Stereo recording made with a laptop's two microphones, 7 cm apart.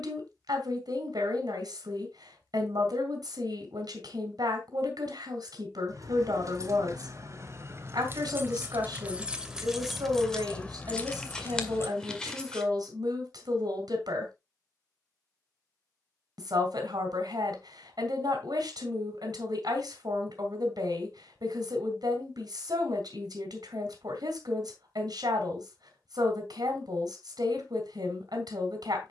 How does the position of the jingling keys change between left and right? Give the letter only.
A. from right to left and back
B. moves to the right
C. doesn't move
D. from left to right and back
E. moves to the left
E.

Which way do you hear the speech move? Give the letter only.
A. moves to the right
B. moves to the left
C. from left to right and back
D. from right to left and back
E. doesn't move
E.